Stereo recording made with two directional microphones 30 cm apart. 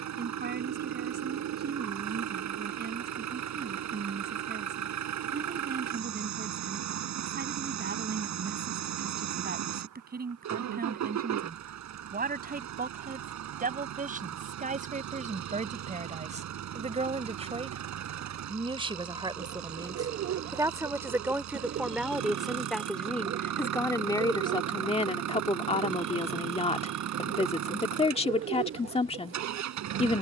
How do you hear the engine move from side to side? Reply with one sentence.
In this clip you hear the engine stay in one place.